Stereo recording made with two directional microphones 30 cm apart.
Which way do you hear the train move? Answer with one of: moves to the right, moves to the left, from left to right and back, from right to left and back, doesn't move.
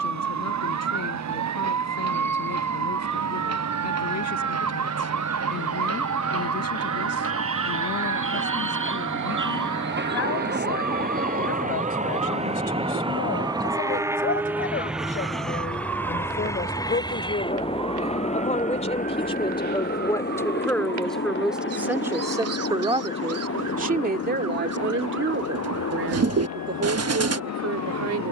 moves to the left.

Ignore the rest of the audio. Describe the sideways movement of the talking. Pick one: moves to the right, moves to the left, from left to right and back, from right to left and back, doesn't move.
moves to the right.